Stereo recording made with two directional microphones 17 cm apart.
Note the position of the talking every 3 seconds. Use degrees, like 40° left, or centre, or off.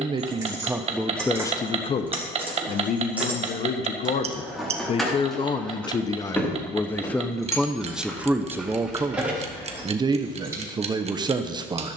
10° left, 40° left, centre, 20° right.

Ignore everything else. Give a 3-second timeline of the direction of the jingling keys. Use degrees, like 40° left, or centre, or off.
10° right, centre, 10° left, 10° right.